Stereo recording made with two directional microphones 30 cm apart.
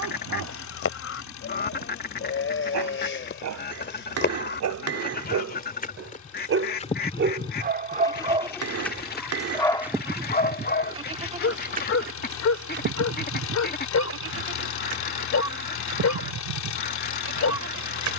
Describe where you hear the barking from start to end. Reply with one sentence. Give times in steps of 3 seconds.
In this clip you hear the barking on the right from 0 s and on the left from 9 s.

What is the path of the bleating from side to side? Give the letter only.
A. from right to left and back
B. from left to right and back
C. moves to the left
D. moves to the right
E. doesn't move
D.